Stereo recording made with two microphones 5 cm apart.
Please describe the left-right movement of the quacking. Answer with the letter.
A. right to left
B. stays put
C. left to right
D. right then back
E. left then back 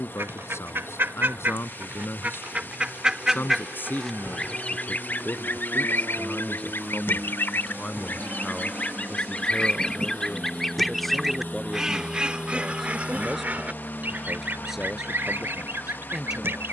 E.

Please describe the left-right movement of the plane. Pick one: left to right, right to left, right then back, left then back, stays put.
right to left.